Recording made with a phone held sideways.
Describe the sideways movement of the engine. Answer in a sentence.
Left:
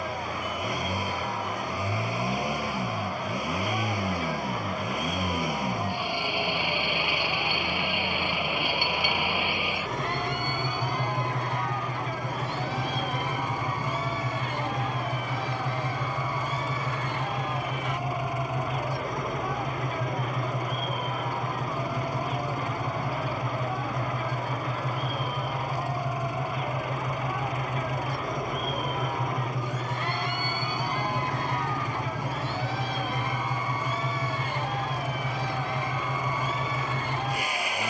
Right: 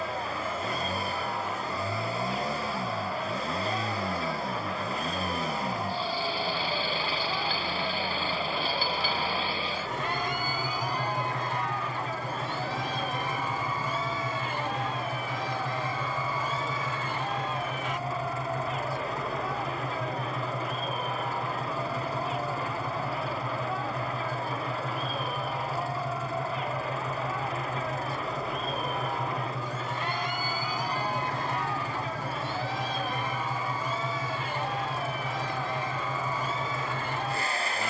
You can hear the engine stay in one place.